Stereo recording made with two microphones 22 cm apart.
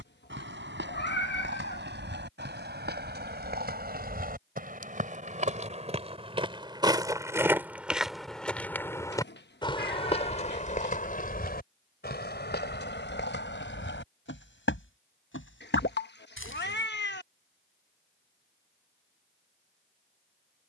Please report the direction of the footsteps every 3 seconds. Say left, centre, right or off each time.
right, right, centre, left, left, left, off.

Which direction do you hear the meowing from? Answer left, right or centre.
left.